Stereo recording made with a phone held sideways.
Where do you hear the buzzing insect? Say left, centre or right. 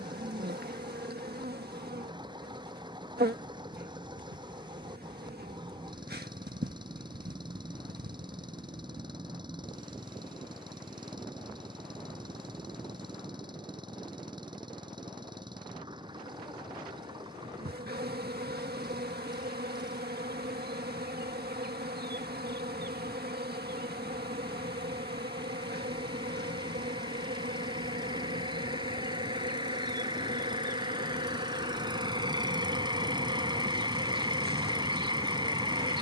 right.